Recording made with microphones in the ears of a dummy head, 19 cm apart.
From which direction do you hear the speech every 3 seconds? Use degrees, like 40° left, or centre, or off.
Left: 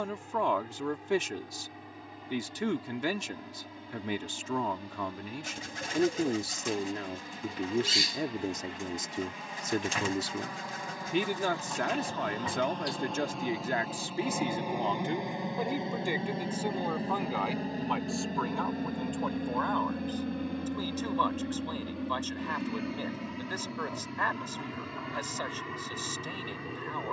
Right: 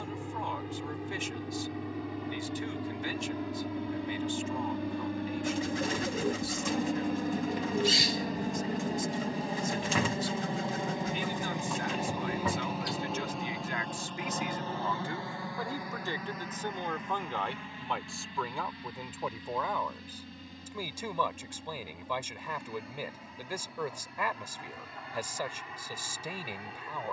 60° left, 60° left, 60° left, 60° left, 40° left, 10° left, 10° right, 10° right, 10° right.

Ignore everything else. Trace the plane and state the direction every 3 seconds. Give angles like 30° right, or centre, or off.
60° right, 60° right, 40° right, 20° right, centre, 30° left, 40° left, 50° left, 60° left.